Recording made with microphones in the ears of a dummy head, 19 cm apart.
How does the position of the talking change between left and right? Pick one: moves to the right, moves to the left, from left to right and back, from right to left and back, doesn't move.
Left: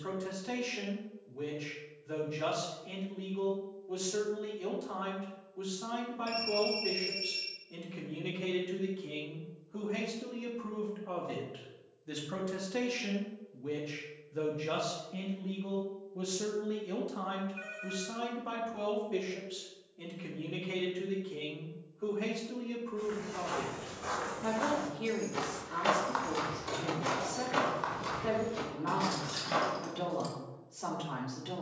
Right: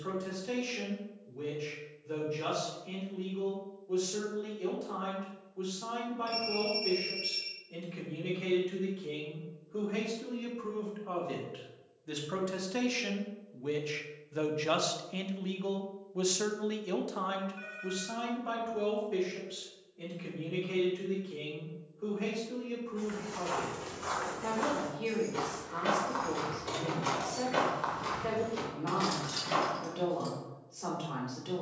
from left to right and back.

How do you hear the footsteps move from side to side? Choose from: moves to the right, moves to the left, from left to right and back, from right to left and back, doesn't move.
from right to left and back.